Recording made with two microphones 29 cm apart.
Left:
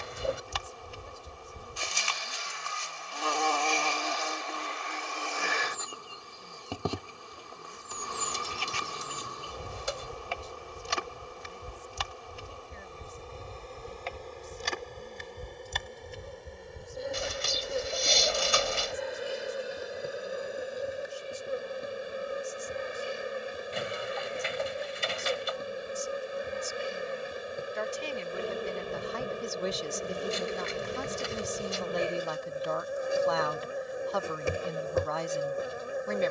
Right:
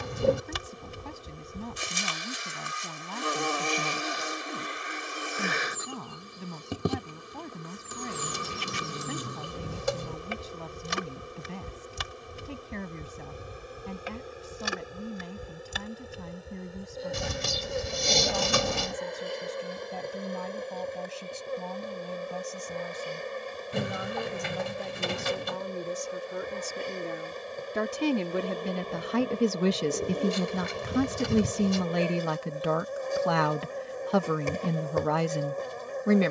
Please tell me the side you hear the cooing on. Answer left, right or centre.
right.